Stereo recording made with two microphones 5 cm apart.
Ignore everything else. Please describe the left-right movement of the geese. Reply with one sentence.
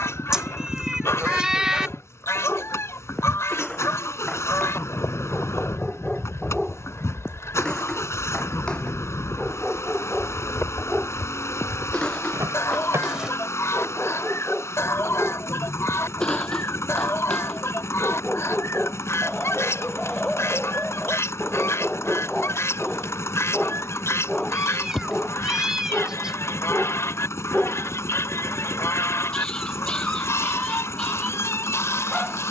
You can hear the geese stay put.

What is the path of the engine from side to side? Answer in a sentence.
In this clip you hear the engine stay put.